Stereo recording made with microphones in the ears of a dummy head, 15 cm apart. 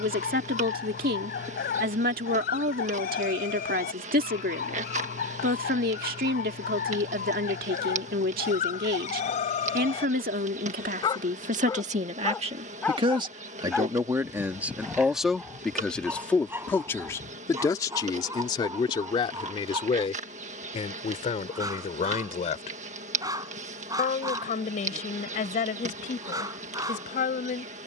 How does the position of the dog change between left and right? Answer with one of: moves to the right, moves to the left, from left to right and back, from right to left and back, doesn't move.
moves to the right.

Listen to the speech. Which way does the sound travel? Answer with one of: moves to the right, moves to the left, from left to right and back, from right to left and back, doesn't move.
moves to the left.